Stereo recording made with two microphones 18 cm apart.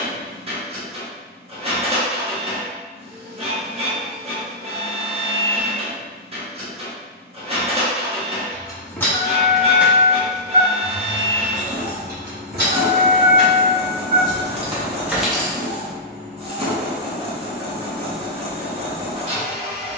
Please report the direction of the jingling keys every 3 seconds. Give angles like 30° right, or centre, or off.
off, off, 20° left, 20° right, 50° right, centre, off.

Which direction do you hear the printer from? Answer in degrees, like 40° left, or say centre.
30° right.